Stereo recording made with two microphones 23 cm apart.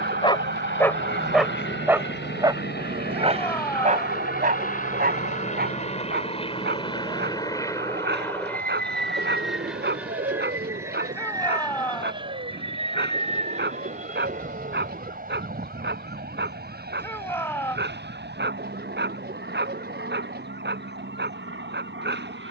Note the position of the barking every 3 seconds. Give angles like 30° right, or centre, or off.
centre, 30° right, 50° right, 50° right, 50° right, 50° right, 50° right, 50° right.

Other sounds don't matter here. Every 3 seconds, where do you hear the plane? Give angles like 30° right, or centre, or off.
60° left, 40° left, 20° left, 10° right, 30° right, 40° right, 50° right, 50° right.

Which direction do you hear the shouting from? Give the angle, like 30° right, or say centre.
10° left.